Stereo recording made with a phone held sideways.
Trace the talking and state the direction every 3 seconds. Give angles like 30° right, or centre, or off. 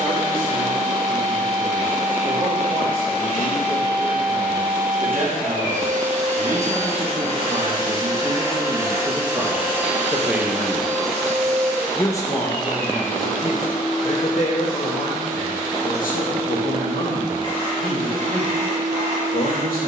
60° right, 60° right, 40° right, 10° right, 40° left, 70° left, 80° left.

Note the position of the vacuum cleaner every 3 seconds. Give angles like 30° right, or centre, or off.
60° right, 60° right, 40° right, centre, centre, 20° right, 50° right.